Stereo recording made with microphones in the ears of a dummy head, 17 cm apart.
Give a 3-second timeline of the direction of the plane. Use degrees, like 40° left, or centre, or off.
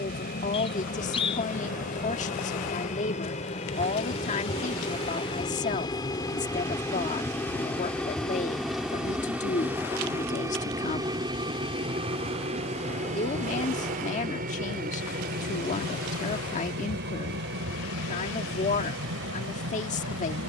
40° left, 30° left, 10° left, 10° right, 40° right, 50° right, 60° right.